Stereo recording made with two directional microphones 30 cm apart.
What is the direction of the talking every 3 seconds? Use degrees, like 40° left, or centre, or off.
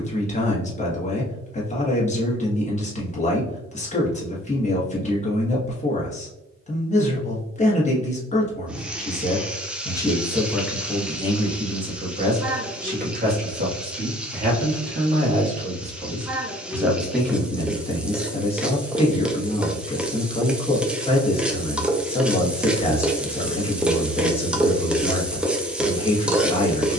20° left, 20° left, 20° left, centre, 30° right, 10° right, 20° left, 20° left, 20° left.